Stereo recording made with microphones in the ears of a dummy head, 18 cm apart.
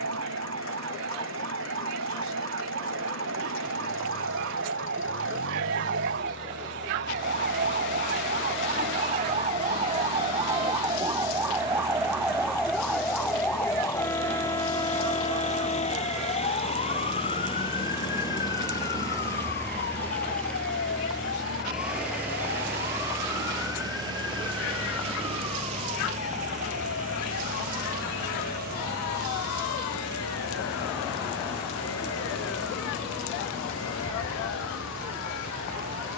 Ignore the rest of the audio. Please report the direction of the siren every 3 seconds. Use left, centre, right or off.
right, right, right, right, centre, left, left, left, left, left, left, left.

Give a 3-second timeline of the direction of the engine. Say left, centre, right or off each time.
left, left, left, left, left, left, centre, centre, right, right, right, right.